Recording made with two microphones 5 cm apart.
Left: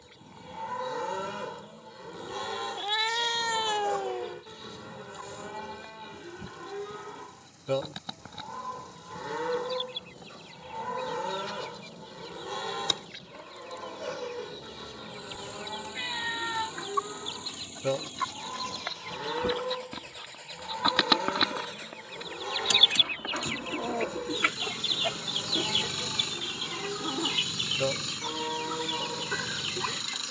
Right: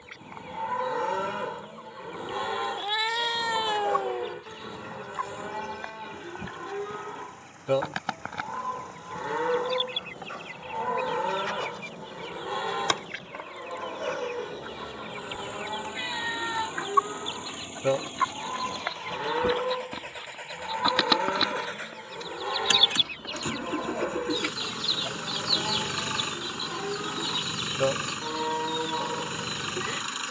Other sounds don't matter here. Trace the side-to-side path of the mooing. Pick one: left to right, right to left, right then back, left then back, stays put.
stays put.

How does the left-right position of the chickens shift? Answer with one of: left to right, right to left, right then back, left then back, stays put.
right to left.